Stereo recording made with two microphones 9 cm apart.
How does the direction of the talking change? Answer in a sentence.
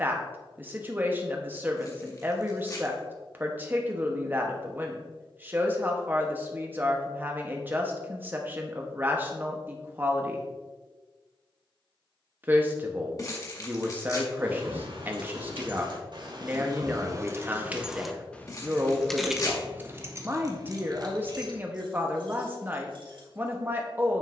In this clip you hear the talking stay in one place.